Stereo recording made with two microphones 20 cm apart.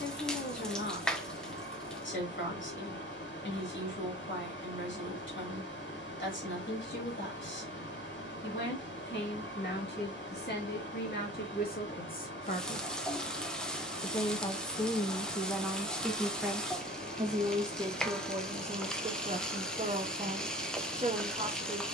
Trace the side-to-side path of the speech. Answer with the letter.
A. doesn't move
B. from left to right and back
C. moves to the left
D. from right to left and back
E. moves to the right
E.